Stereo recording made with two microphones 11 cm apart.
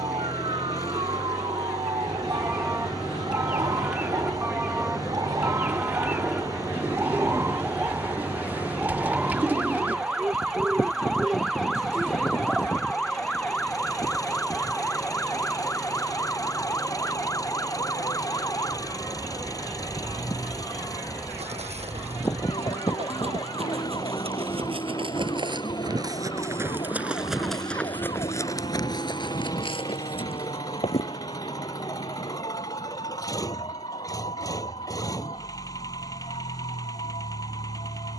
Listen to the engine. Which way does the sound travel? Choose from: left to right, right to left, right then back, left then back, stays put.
stays put.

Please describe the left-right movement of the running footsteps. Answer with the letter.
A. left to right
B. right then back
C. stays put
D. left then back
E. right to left
E.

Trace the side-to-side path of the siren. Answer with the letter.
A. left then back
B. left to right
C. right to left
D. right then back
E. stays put
C.